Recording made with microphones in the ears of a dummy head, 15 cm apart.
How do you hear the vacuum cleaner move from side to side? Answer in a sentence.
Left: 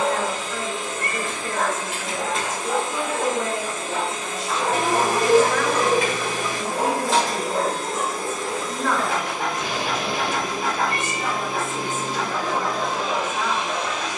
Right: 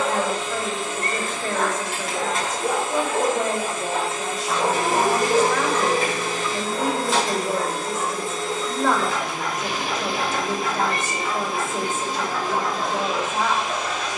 In this clip you hear the vacuum cleaner stay put.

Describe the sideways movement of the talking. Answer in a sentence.
You can hear the talking stay put.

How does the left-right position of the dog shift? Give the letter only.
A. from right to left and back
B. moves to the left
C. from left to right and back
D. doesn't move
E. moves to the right
B.